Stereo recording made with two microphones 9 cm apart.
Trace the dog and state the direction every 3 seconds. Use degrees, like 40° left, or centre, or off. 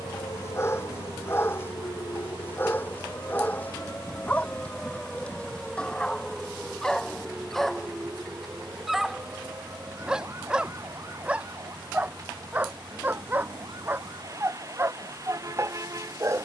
30° left, 20° left, centre, 10° right, 20° right, 30° right.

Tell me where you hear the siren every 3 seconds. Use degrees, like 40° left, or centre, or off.
50° left, 20° left, 10° right, 30° right, 40° right, 50° right.